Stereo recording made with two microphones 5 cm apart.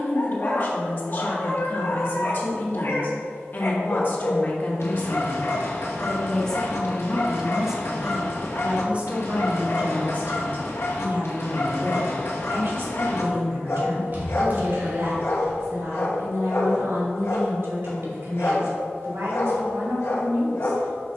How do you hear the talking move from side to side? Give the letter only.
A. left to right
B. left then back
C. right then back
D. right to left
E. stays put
A.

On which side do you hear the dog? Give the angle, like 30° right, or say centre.
60° left.